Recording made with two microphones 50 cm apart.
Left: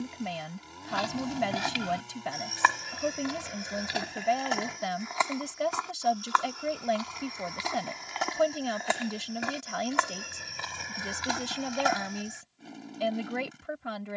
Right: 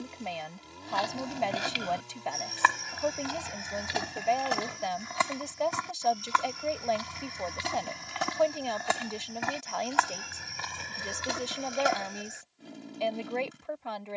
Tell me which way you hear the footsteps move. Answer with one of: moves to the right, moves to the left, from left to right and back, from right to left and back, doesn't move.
from left to right and back.